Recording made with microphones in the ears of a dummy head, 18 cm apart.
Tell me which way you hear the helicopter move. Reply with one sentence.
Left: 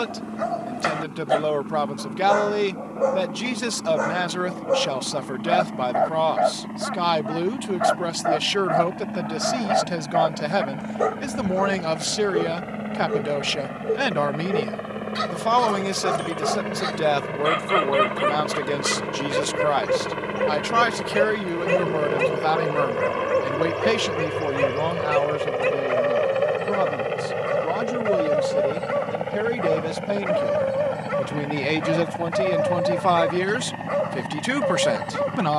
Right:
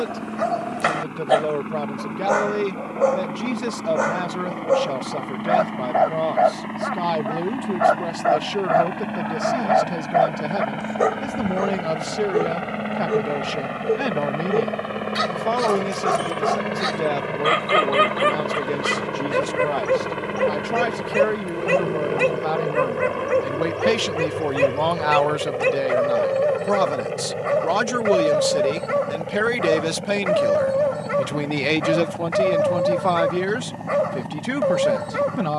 In this clip you hear the helicopter go from the right side to the left.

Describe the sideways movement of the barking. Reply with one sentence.
In this clip you hear the barking stay put.